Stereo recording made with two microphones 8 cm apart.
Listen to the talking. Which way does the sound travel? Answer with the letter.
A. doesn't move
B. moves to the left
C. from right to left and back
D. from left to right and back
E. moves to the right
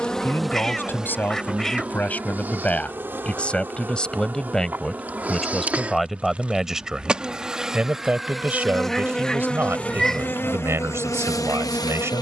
E.